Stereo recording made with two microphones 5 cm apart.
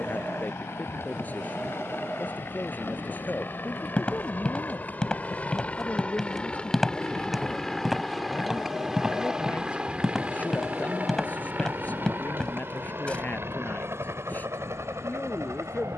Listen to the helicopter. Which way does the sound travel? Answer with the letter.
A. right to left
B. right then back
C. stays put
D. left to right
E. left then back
D.